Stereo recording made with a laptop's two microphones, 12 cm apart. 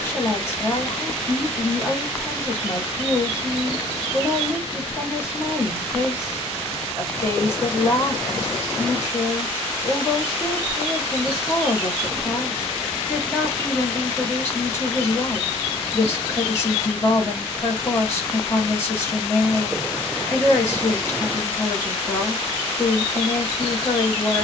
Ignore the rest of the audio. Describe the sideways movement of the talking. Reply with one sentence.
In this clip you hear the talking stay put.